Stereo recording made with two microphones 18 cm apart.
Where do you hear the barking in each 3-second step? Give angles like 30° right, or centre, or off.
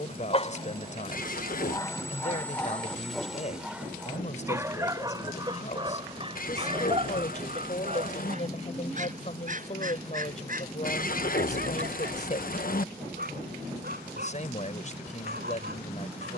20° left, 10° right, 40° right, 50° right, 60° right, 60° right.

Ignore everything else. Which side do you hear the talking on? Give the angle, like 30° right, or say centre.
40° left.